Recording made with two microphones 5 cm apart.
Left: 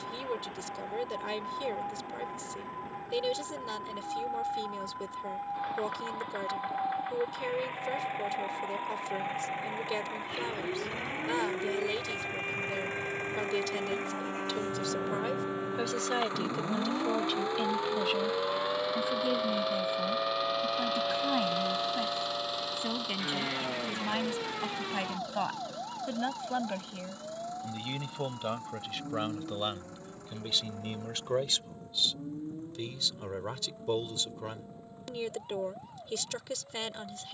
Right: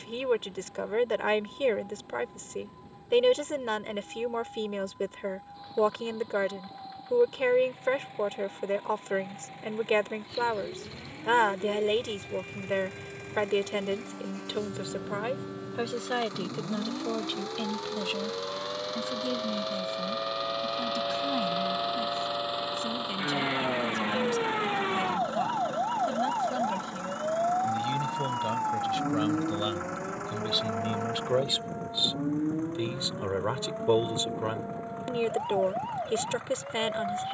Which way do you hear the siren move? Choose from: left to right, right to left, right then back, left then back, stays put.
left to right.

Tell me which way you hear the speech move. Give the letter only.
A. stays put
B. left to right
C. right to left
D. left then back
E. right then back
D.